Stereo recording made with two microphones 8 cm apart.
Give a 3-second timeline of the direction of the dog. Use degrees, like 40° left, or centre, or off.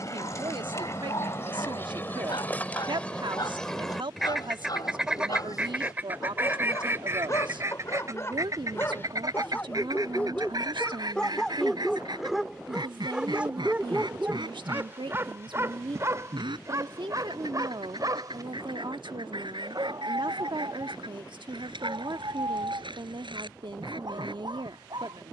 60° left, 50° left, 40° left, 10° left, 10° right, 40° right, 60° right, 60° right, 70° right.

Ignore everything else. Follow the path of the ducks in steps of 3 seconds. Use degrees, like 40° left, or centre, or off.
30° left, centre, 40° right, 60° right, 70° right, 70° right, 80° right, 80° right, 80° right.